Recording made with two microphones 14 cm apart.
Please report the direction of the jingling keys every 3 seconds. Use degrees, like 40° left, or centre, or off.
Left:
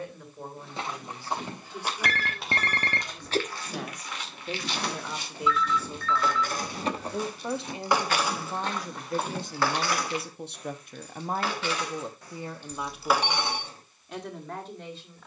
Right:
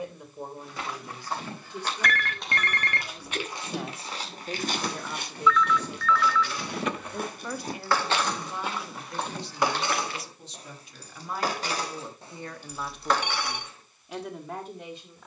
off, 60° left, 30° left, 30° right, centre.